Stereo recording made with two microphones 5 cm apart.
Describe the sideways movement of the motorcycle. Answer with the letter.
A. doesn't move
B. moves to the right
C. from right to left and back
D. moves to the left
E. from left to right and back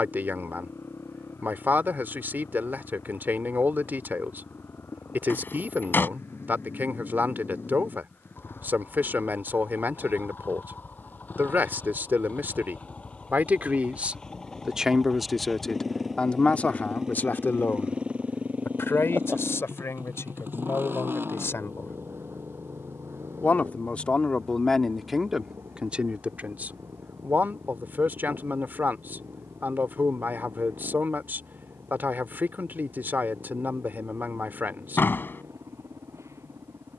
B.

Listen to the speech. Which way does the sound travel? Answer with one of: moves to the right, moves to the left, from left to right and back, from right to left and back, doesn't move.
from right to left and back.